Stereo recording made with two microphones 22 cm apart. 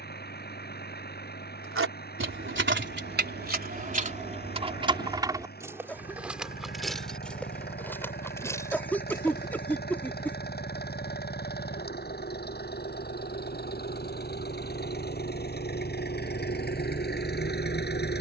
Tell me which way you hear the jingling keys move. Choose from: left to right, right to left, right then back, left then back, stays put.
right to left.